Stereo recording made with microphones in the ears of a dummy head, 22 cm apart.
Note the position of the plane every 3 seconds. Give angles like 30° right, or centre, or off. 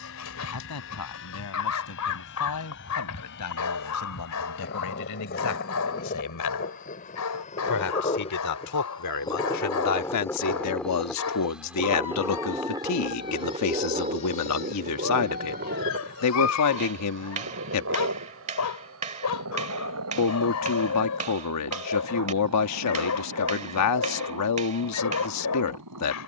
60° left, 50° left, 30° left, 10° left, 20° right, 40° right, 60° right, 70° right, 70° right.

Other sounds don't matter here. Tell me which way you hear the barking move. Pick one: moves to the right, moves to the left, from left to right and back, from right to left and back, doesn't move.
doesn't move.